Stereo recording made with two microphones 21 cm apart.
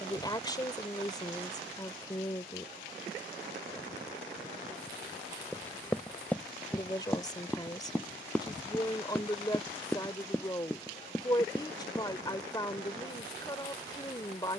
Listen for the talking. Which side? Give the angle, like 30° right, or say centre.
20° left.